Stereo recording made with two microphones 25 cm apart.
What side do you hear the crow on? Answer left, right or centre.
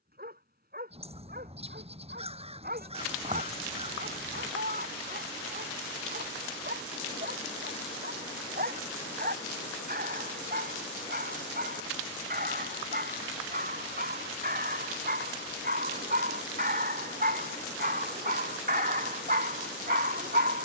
right.